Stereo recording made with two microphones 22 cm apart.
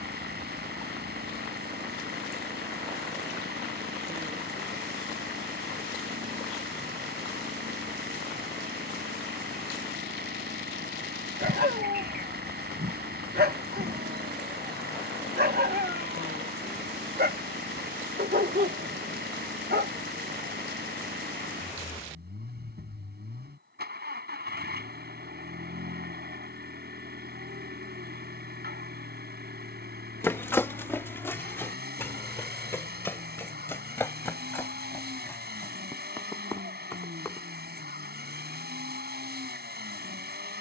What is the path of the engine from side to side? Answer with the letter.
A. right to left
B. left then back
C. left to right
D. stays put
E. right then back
D.